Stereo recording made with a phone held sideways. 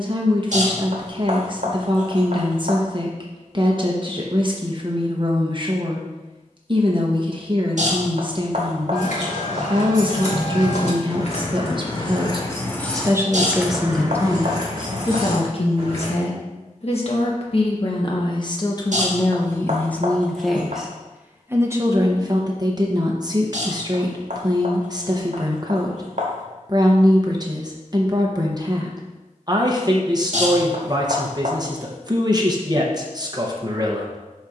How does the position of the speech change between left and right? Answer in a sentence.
In this clip you hear the speech go left and come back.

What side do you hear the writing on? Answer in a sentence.
You can hear the writing on the right.